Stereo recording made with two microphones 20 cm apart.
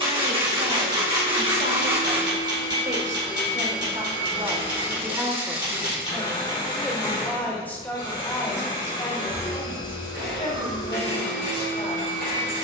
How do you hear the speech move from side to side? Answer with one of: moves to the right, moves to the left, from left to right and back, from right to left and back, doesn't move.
moves to the left.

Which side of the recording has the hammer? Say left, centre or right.
right.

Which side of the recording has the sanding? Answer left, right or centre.
right.